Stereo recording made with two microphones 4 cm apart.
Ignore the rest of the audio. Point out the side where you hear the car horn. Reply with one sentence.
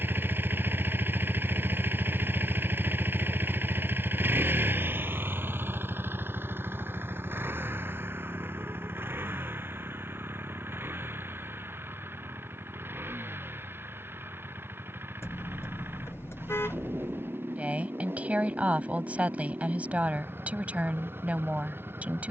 You can hear the car horn on the left.